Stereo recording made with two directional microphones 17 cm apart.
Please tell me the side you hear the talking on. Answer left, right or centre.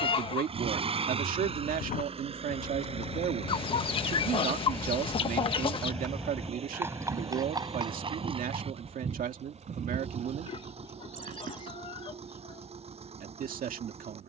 right.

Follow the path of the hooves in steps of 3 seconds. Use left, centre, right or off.
left, left, right, right, off.